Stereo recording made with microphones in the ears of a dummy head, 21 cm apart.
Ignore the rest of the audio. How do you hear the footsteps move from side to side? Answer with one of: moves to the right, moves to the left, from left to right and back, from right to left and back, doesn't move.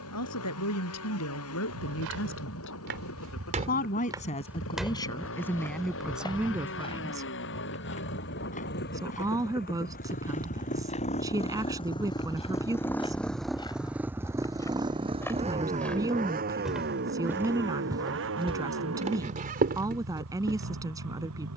from right to left and back.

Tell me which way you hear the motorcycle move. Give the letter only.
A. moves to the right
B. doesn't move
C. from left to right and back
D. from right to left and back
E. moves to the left
A.